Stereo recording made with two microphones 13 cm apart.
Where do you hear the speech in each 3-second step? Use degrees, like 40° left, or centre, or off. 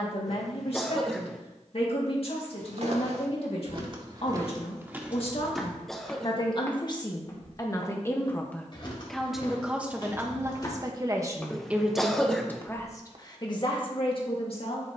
50° left, 50° left, 30° left, 20° right, 30° left.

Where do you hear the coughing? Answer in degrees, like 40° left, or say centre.
centre.